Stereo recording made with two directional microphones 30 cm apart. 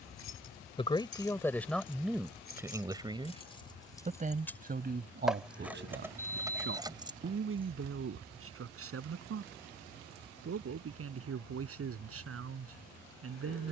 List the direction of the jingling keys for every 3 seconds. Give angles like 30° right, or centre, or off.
40° left, 10° left, 10° right, off, off.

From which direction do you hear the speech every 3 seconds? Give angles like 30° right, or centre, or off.
centre, 30° right, 40° right, 50° right, 50° right.